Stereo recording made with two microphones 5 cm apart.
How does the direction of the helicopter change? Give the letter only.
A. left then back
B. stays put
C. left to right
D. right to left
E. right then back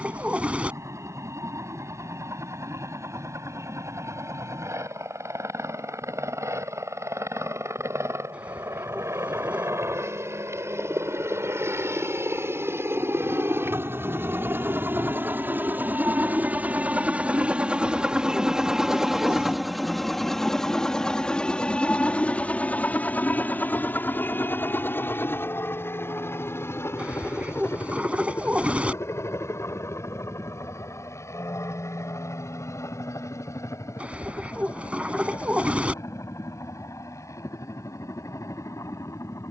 D.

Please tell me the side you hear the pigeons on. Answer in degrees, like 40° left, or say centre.
20° right.